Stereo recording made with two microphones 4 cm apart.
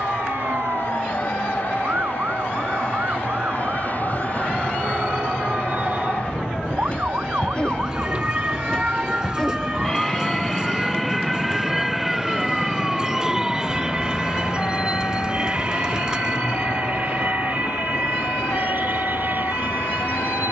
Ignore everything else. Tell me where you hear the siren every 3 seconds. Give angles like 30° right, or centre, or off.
60° right, 50° right, 30° right, 10° right, 10° left, 40° left, 50° left.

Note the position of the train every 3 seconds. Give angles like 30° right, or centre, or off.
50° left, 40° left, 30° left, 10° left, 20° right, 40° right, 50° right.